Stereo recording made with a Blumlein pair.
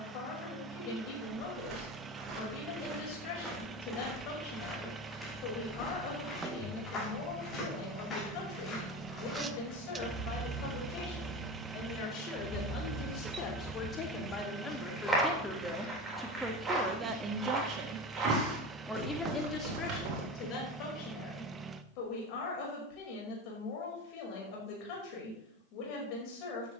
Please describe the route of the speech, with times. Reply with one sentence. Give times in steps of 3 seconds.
You can hear the speech on the left from 0 s, in the centre from 15 s and on the left from 18 s.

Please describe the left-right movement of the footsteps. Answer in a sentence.
You can hear the footsteps move from right to left and back again.